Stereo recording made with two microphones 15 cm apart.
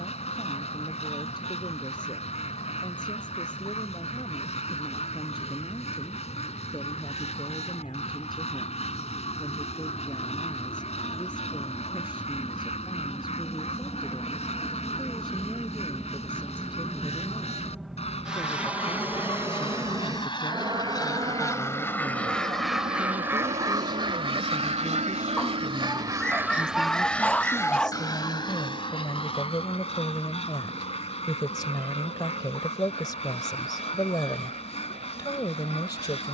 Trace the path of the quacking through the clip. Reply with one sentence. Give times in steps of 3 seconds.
You can hear the quacking on the left from 0 s, in the centre from 21 s, on the right from 24 s and on the left from 27 s.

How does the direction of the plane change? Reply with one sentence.
In this clip you hear the plane move from left to right.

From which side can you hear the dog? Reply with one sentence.
In this clip you hear the dog in the centre.